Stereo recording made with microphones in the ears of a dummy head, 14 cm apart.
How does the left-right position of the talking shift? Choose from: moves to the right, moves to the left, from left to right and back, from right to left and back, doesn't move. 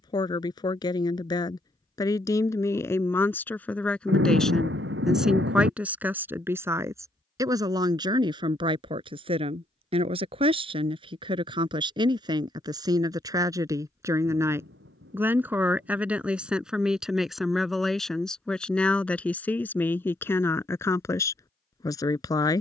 from left to right and back.